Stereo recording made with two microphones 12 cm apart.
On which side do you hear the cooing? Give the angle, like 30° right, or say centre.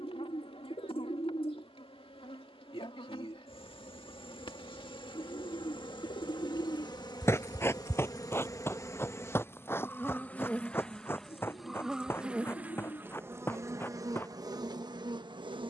50° left.